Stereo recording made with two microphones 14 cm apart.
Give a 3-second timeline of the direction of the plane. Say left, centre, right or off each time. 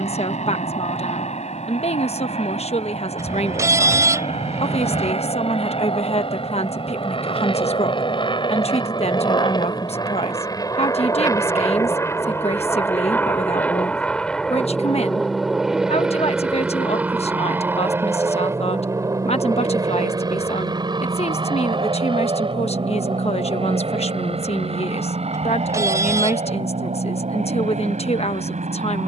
left, left, left, left, centre, centre, right, right, right, right.